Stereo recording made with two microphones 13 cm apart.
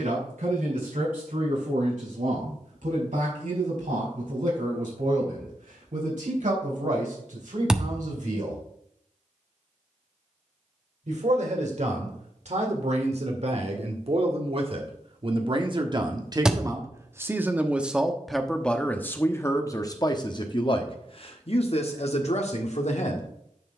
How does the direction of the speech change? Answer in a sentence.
In this clip you hear the speech move to the left.